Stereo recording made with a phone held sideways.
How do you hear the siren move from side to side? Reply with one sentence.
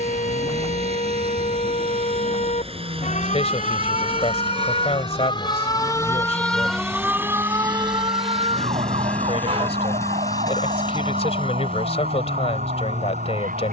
You can hear the siren go from the left side to the right.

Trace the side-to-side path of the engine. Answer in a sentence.
You can hear the engine move to the left.